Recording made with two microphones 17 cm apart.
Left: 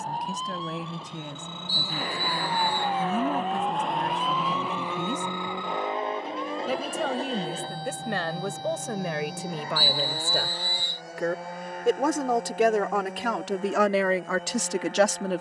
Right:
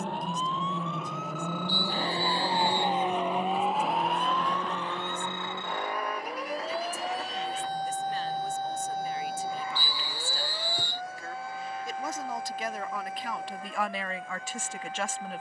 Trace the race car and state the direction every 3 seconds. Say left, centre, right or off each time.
right, centre, left, left, left.